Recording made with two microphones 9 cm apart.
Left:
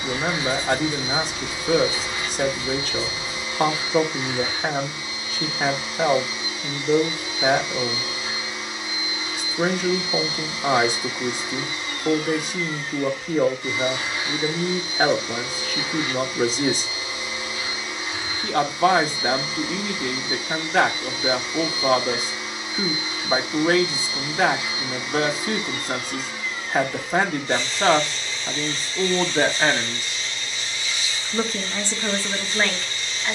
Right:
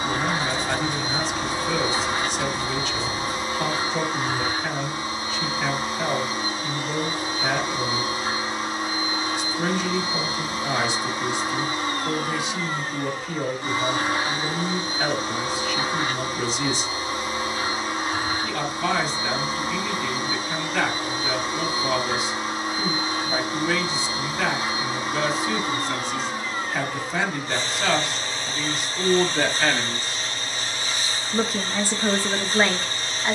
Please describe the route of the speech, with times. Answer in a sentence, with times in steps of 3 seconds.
In this clip you hear the speech on the left from 0 s and in the centre from 30 s.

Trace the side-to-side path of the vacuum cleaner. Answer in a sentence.
You can hear the vacuum cleaner stay put.